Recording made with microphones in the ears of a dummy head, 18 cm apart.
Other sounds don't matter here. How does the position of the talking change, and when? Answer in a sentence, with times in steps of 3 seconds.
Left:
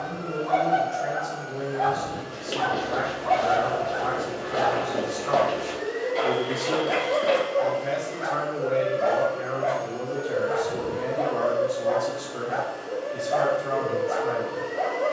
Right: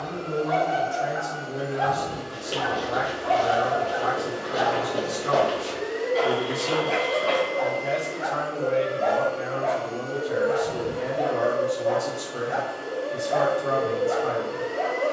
In this clip you hear the talking on the right from 0 s, in the centre from 6 s and on the right from 12 s.